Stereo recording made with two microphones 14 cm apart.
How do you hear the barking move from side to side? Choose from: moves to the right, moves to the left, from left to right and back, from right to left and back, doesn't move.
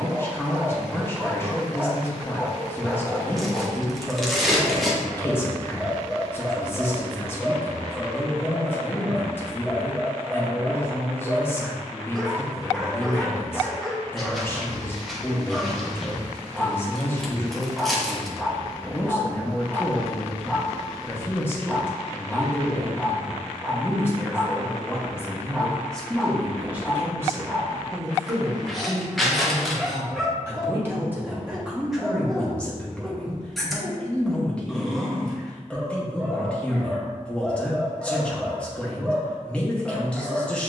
doesn't move.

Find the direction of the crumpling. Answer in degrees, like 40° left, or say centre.
centre.